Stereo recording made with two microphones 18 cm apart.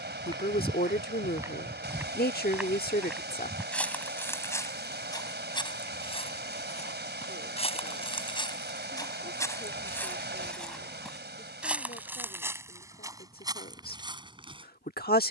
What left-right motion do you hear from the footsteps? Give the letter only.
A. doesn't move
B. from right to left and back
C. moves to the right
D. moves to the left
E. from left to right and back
B.